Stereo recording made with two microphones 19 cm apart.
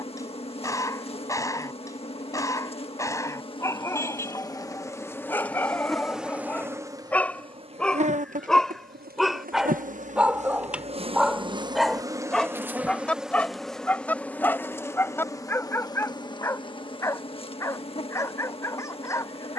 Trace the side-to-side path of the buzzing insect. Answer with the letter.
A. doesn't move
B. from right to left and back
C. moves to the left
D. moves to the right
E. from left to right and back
E.